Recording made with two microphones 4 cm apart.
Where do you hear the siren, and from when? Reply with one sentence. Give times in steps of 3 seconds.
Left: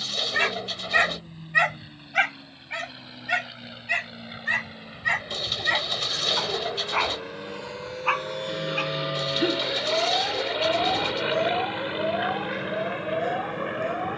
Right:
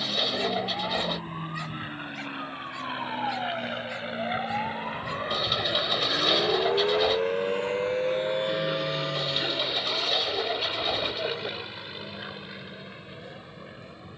You can hear the siren on the right from 0 s and on the left from 9 s.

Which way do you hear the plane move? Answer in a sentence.
In this clip you hear the plane move from right to left.